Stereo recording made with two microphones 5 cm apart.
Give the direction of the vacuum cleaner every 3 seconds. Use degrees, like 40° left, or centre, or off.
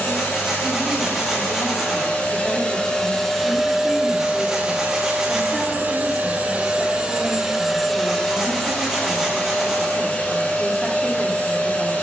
40° left, 20° right, 10° right, 40° left.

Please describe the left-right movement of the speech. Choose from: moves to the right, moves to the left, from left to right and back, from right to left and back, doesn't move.
doesn't move.